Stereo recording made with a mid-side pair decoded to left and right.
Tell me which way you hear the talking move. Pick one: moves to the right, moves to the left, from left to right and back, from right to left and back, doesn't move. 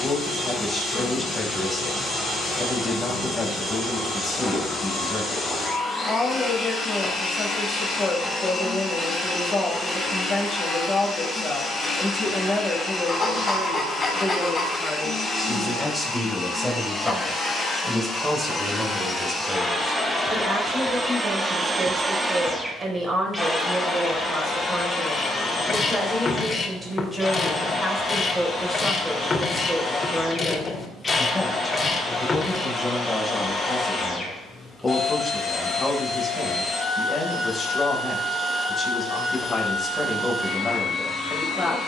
from left to right and back.